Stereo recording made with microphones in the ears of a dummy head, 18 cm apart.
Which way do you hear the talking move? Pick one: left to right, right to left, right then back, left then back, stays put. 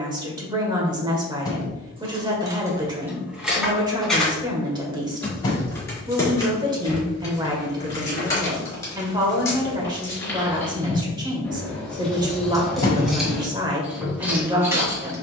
stays put.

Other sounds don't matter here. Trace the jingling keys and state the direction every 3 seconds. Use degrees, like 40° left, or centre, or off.
20° right, centre, 20° left, 10° left, centre.